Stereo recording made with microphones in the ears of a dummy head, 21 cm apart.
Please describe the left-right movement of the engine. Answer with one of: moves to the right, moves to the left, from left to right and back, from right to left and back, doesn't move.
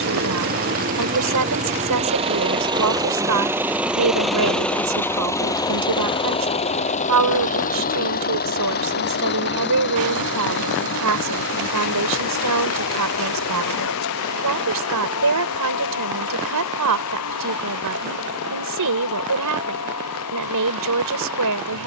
moves to the left.